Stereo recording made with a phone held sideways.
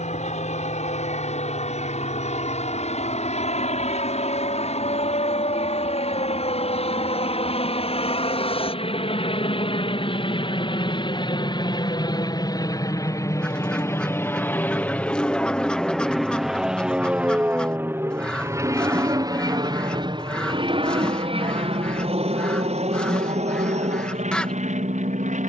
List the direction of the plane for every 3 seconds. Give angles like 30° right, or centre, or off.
60° left, 60° left, 50° left, 40° left, 20° left, centre, 30° right, 50° right, 60° right.